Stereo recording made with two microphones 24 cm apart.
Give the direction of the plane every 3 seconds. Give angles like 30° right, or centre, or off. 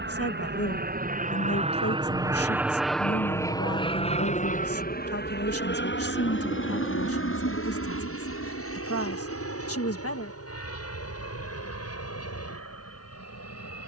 30° right, 30° left, 60° left, 70° left, 70° left.